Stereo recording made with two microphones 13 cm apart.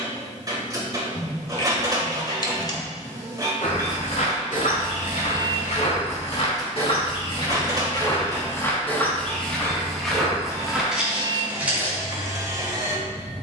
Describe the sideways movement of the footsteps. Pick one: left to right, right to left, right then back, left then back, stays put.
left to right.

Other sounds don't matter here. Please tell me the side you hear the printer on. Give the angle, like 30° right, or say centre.
30° right.